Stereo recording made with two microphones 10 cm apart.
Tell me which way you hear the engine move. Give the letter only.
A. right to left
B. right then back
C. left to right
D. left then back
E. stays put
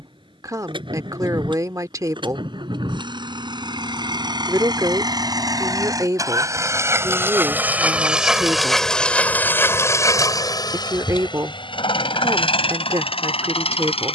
A.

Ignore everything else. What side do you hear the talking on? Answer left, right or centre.
right.